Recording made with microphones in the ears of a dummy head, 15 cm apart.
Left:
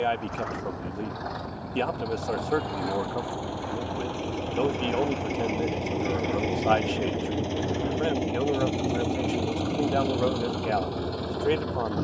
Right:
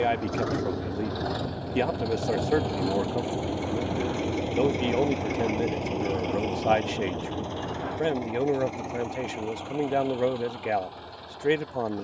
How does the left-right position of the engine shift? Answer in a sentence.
You can hear the engine travel towards the left.